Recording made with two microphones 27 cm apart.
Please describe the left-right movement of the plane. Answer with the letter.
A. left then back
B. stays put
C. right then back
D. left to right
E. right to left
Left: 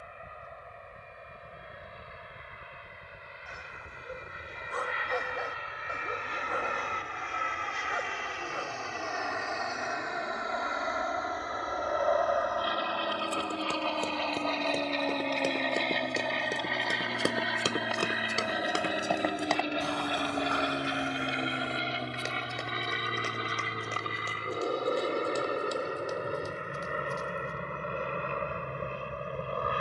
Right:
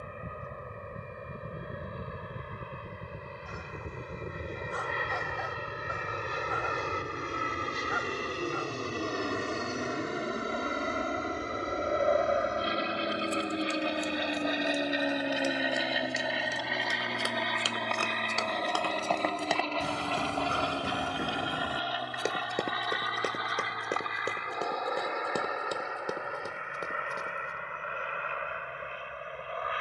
E.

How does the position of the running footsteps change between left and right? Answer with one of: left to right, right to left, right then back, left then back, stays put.
left to right.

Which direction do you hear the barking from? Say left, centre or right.
left.